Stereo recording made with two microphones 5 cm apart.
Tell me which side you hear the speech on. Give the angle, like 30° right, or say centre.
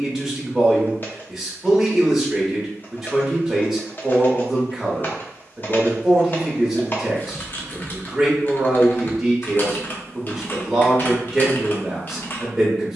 centre.